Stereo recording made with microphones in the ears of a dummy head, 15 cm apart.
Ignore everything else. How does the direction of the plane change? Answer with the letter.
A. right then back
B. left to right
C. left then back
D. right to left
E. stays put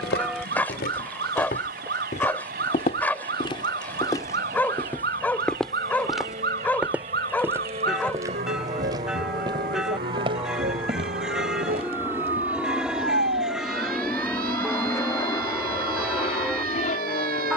D.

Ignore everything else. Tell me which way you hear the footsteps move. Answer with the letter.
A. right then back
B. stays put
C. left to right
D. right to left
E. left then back
C.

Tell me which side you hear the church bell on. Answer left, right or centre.
centre.